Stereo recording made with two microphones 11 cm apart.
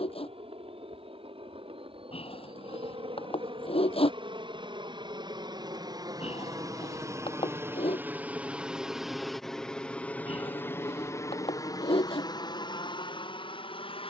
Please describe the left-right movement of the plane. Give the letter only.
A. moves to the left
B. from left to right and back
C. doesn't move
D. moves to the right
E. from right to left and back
A.